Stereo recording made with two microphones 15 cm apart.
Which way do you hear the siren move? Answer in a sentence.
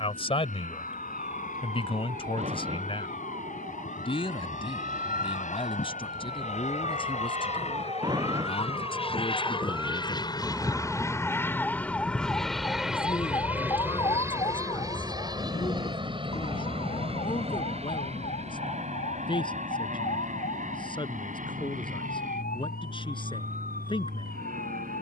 In this clip you hear the siren travel towards the left.